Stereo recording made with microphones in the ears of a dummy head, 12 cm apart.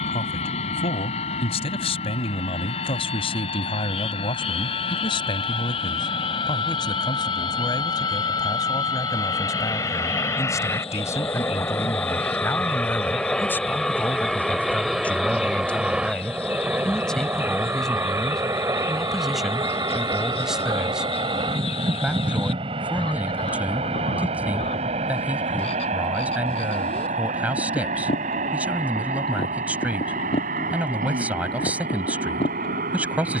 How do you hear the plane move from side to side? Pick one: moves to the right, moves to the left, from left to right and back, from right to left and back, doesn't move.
moves to the right.